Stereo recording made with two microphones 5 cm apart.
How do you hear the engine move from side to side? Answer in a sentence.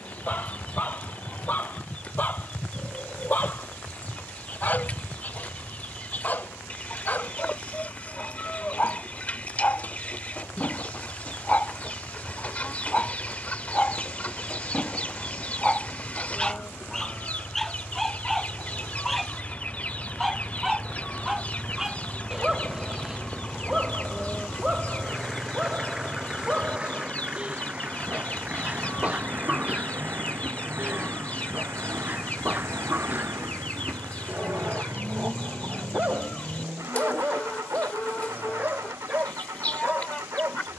You can hear the engine move from left to right.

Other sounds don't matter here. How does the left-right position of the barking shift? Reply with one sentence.
In this clip you hear the barking move to the right.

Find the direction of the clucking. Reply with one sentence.
You can hear the clucking on the left.